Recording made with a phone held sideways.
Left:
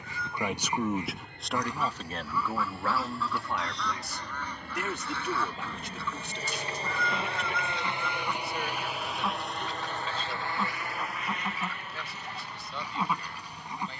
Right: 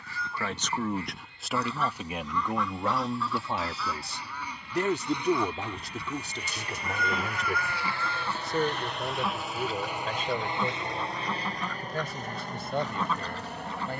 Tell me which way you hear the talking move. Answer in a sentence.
You can hear the talking move to the right.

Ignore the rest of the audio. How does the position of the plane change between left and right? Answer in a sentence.
You can hear the plane move to the right.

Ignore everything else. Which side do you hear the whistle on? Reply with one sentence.
You can hear the whistle on the left.